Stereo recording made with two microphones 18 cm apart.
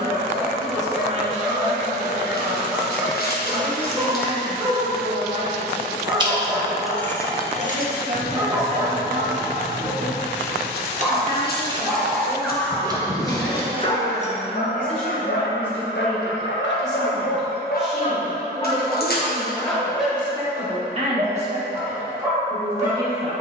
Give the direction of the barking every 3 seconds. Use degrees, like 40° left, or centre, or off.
20° right, 20° right, 20° right, 10° right, 20° left, 70° left, 10° left, 10° right.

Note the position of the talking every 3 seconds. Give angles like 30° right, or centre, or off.
40° right, 40° right, 40° right, 20° right, centre, centre, 20° right, 40° right.